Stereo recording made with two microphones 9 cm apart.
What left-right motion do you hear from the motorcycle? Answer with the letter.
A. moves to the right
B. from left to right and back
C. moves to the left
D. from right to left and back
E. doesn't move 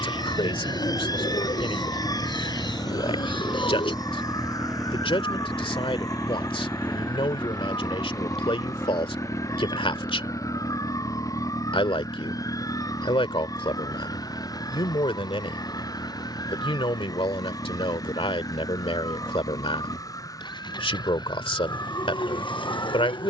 C.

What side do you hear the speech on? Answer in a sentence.
You can hear the speech on the left.